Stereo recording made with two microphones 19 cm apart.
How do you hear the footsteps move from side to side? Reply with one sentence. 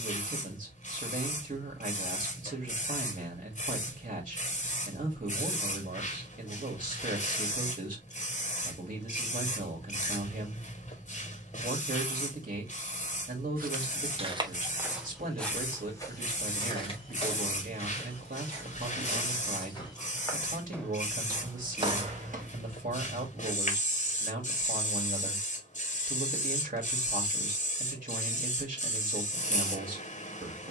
You can hear the footsteps move from right to left and back again.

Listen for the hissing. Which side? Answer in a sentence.
You can hear the hissing on the left.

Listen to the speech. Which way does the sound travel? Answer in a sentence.
You can hear the speech stay put.